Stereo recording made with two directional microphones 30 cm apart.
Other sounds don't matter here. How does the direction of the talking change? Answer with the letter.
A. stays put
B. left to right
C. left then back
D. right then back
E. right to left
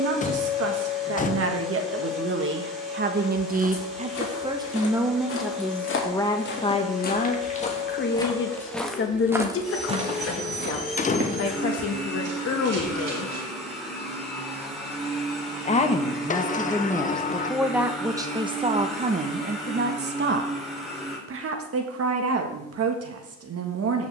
C.